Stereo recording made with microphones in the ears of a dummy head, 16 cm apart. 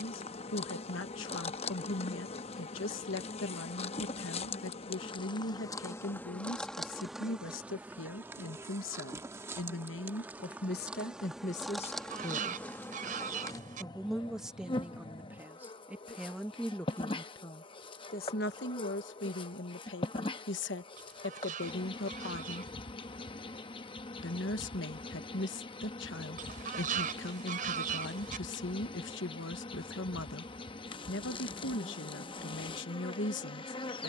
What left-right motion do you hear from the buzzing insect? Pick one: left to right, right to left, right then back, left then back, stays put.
right then back.